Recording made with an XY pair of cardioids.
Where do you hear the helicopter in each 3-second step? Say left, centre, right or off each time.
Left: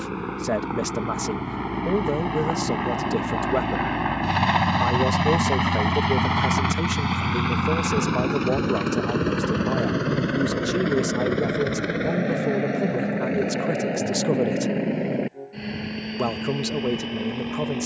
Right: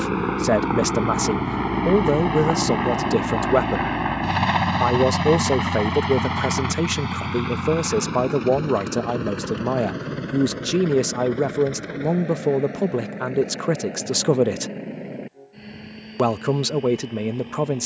right, centre, left, left, left, left.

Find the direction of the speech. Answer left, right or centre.
right.